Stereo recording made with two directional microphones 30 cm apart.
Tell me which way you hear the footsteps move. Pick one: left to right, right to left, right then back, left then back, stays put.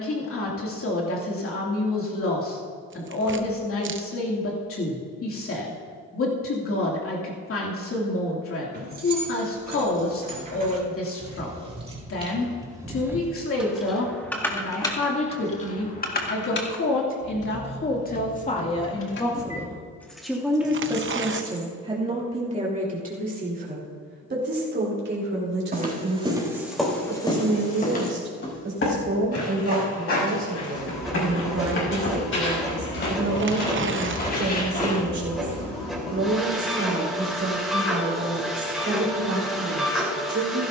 left then back.